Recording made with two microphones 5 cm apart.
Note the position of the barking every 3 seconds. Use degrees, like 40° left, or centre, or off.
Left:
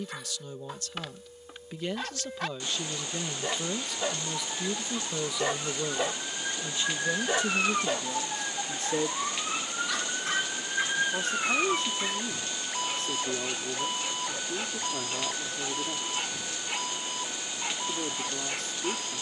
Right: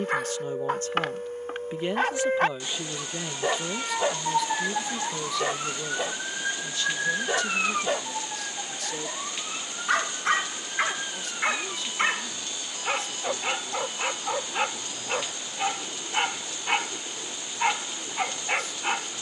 50° right, 20° right, 10° right, 50° right, 60° right, 60° right, 60° right.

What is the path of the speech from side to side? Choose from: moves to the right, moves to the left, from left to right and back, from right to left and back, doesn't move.
moves to the left.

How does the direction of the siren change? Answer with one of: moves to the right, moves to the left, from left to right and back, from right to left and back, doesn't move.
moves to the left.